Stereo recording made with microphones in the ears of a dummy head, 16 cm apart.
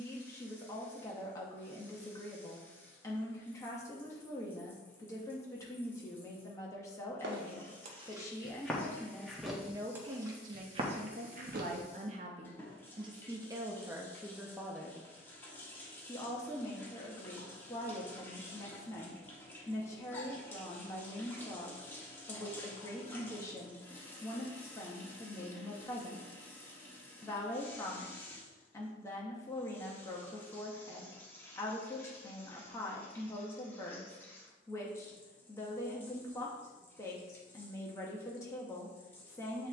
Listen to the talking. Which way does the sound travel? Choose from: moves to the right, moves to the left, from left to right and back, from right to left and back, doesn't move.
from left to right and back.